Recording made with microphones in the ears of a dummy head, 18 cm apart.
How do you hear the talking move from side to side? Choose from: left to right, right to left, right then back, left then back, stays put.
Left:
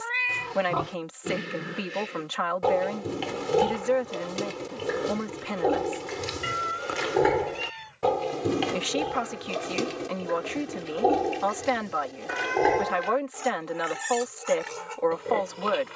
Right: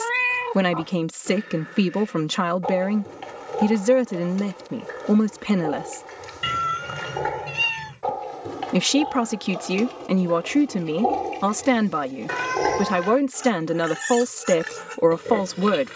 stays put.